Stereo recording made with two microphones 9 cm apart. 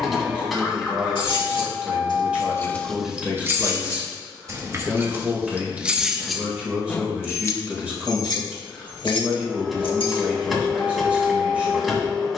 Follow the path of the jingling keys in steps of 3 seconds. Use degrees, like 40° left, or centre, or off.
60° left, 30° right, 20° left, 70° left.